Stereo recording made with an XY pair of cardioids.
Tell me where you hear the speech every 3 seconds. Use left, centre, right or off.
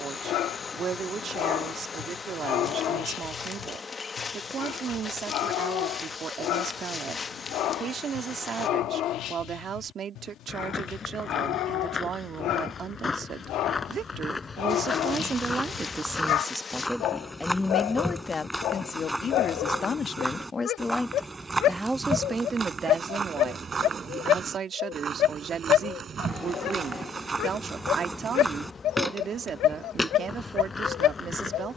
right, right, right, right, right, centre, left, right, right, right, right.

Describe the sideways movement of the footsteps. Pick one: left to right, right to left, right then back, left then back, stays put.
right then back.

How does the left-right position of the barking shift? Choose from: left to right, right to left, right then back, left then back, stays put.
stays put.